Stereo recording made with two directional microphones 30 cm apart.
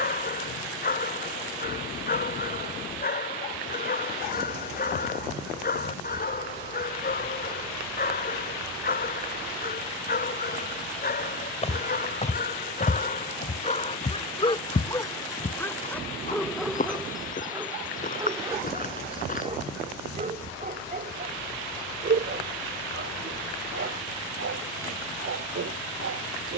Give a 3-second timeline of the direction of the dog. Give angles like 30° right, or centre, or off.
30° left, 30° left, 30° left, 30° left, 20° left, centre, 20° right, 40° right, 40° right.